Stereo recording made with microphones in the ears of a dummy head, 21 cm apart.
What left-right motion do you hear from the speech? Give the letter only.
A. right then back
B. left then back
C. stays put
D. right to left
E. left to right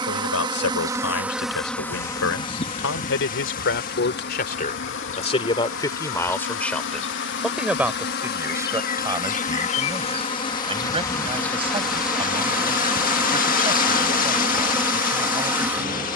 E.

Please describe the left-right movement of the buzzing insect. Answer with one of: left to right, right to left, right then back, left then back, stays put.
left then back.